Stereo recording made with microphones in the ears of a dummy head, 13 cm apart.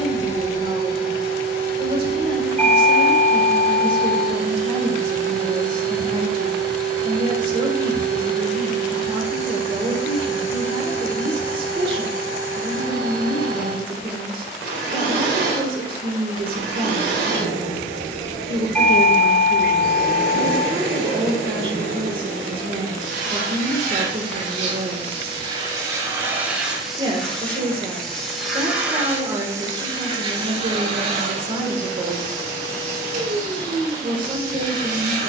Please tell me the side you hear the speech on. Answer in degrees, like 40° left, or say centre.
40° right.